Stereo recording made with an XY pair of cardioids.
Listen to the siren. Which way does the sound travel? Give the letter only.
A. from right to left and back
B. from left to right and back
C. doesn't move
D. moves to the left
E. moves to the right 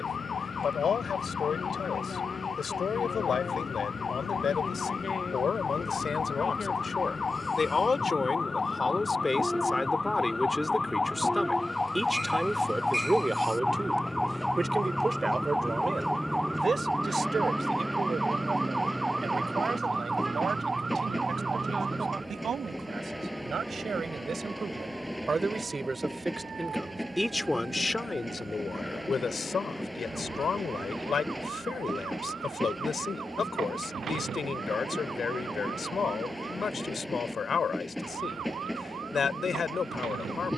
E.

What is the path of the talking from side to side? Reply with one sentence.
In this clip you hear the talking go right and come back.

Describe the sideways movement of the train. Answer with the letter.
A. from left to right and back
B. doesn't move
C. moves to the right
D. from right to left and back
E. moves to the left
B.